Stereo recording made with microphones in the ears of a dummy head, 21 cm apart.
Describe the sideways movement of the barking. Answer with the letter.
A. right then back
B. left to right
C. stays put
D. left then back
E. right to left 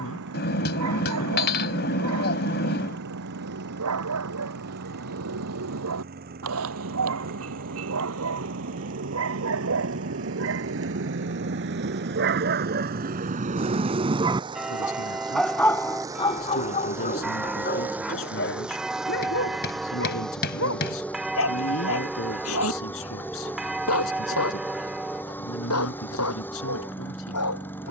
E.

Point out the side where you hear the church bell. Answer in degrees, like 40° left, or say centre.
centre.